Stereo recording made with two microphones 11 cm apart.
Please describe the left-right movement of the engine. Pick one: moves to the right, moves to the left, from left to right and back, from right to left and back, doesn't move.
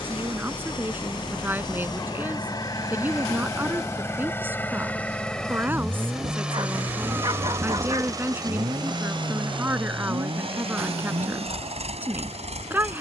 moves to the right.